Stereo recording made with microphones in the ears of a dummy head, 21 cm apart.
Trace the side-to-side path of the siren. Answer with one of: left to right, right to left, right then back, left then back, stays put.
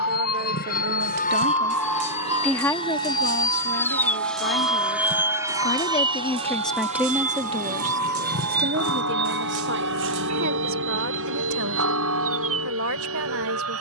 left to right.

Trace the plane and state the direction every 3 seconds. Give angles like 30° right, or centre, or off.
40° left, centre, 40° right, 50° right, 60° right.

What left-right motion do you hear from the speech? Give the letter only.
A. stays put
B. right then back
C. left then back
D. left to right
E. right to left
C.